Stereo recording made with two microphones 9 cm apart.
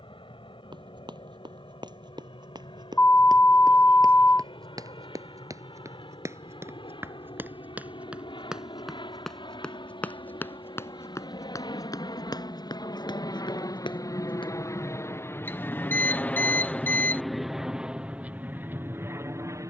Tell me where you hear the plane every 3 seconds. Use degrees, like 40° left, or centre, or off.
80° left, 70° left, 70° left, 60° left, 50° left, 10° left, 20° right.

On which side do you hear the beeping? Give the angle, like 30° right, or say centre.
20° left.